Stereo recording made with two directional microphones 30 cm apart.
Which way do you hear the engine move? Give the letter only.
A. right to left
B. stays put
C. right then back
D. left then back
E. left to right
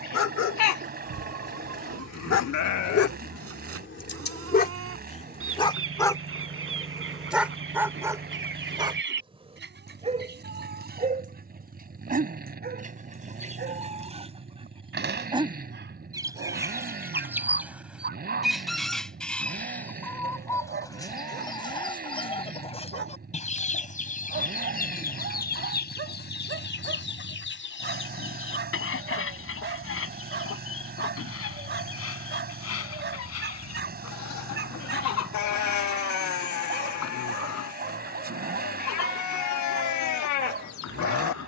B.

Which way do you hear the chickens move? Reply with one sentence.
You can hear the chickens go from the right side to the left.